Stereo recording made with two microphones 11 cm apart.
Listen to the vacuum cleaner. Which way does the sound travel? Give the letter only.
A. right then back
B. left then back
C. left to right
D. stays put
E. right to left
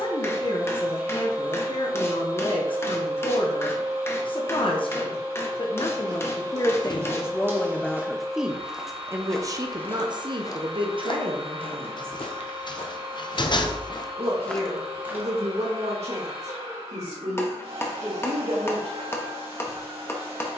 D.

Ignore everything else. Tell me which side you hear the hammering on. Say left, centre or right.
left.